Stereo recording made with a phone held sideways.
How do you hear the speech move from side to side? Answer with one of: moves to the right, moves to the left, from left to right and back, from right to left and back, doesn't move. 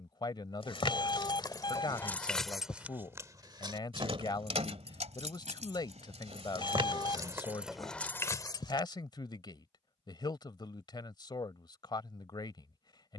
doesn't move.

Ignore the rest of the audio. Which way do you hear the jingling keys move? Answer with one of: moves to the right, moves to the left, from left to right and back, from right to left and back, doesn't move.
from left to right and back.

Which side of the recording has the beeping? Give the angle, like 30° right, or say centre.
40° left.